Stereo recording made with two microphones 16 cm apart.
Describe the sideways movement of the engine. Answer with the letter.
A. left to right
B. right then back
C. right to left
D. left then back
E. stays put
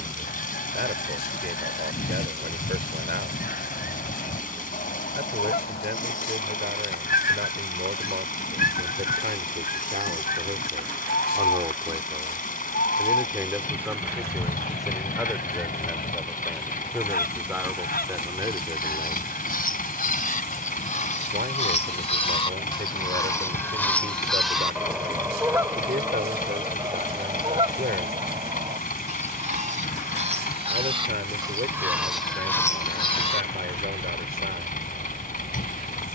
E.